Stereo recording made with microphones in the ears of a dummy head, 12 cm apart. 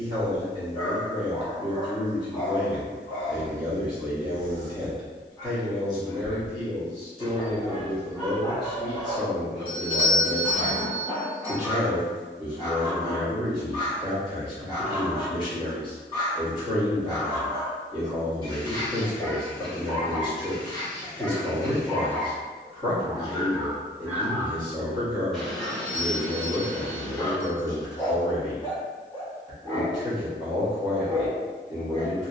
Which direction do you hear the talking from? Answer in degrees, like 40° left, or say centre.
40° left.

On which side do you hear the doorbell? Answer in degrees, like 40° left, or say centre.
40° left.